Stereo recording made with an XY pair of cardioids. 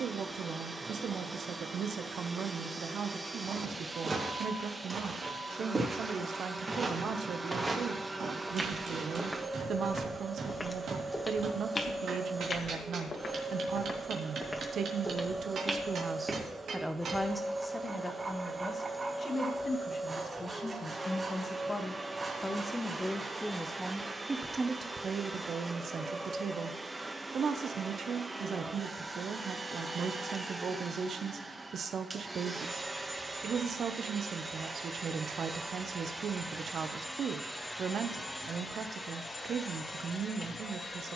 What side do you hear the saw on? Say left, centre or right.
right.